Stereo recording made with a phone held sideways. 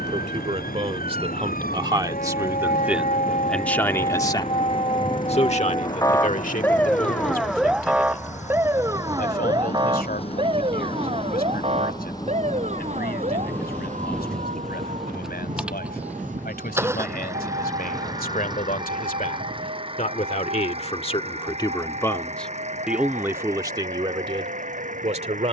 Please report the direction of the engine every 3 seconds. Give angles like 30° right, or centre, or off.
70° left, 60° left, 50° left, 40° left, 10° left, 10° right, 30° right, 50° right, 50° right.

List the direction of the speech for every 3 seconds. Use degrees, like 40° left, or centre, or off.
30° right, 20° left, 60° left, 80° left, 80° left, 80° left, 60° left, 10° left, 40° right.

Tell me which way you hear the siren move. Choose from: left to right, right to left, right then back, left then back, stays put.
left to right.